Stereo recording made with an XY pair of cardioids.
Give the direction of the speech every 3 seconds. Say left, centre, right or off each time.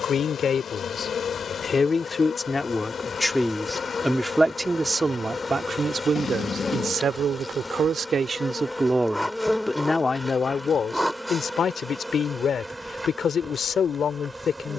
left, centre, right, left, left.